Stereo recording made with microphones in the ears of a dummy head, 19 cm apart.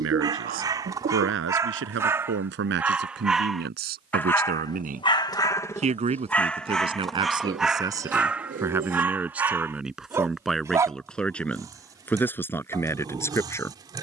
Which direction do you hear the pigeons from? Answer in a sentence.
In this clip you hear the pigeons on the right.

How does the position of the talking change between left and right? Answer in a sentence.
You can hear the talking travel towards the left.